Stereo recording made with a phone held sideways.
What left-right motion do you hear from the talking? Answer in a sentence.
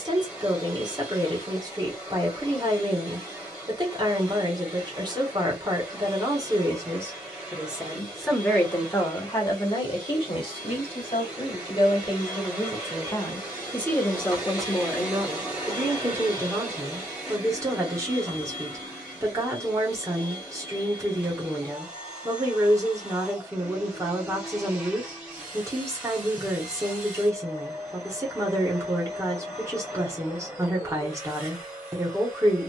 In this clip you hear the talking move from right to left and back again.